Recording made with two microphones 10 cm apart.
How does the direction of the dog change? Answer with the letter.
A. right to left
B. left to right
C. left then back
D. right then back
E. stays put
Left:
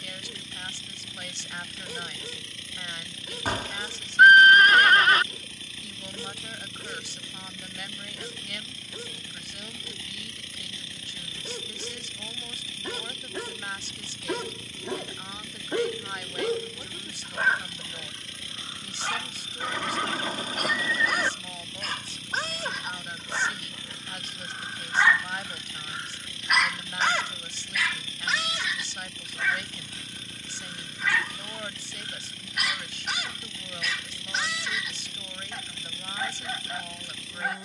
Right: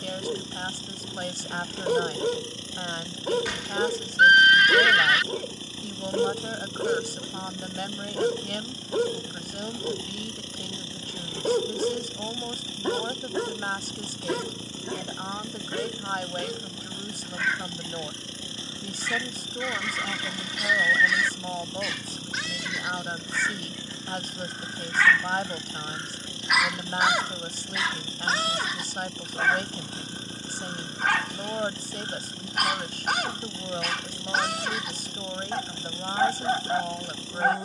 C.